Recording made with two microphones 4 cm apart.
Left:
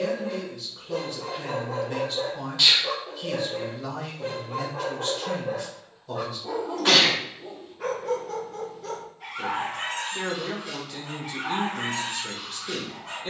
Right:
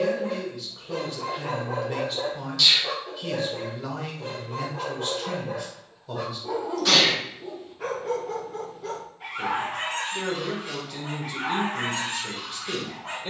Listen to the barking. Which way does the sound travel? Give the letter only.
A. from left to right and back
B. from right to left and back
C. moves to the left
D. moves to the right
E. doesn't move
B.